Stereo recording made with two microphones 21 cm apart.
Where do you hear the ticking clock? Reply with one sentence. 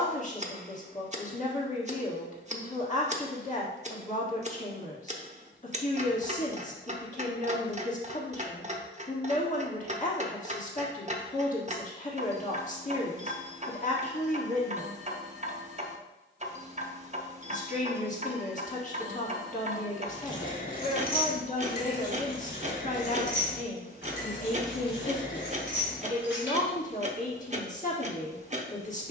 In this clip you hear the ticking clock on the right.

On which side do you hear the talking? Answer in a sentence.
You can hear the talking on the left.